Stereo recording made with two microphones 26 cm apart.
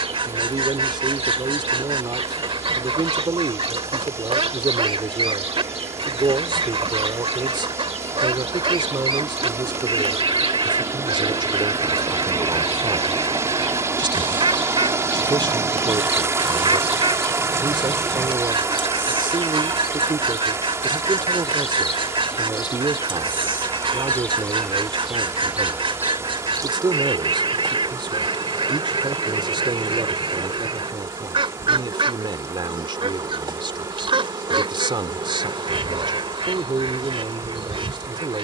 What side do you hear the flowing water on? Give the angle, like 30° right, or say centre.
10° right.